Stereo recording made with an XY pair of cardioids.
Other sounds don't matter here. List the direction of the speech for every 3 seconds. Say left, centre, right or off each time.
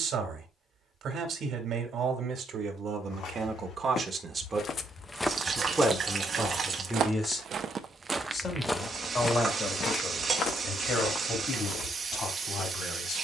right, right, centre, left, left.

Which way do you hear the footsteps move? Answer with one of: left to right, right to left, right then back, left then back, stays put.
right then back.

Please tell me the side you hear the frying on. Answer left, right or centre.
right.